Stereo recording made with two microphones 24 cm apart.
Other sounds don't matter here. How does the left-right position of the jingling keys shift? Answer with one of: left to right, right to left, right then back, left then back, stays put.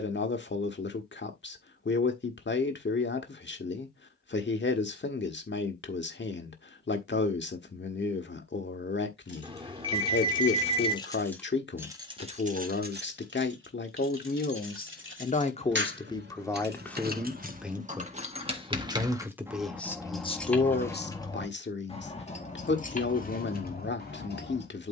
right then back.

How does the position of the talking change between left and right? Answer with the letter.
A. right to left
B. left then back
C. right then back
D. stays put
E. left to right
C.